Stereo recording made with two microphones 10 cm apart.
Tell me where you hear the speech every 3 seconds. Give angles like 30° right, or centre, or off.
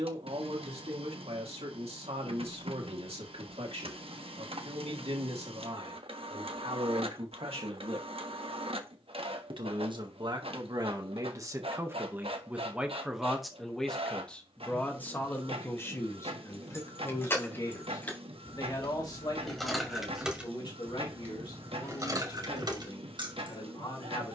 80° right, 80° right, 70° right, 40° right, centre, 30° left, 40° left, 50° left.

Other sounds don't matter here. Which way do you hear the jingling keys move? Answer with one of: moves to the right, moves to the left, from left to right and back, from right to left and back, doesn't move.
moves to the right.